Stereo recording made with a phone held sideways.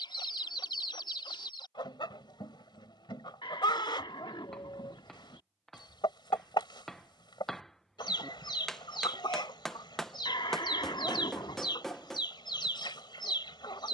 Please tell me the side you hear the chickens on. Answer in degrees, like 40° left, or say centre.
40° left.